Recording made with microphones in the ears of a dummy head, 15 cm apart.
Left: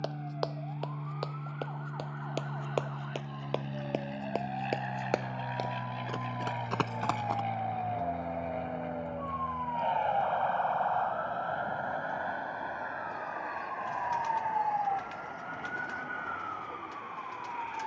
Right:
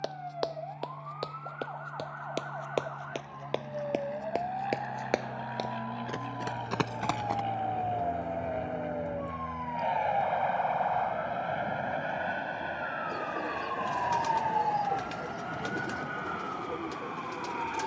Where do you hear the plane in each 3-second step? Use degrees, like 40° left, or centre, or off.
50° left, 30° left, 10° left, 10° right, 30° right, 50° right.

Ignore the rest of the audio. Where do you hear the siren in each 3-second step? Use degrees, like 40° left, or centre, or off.
60° right, 50° right, 40° right, 20° right, 10° left, 40° left.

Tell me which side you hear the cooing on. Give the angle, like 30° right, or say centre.
60° right.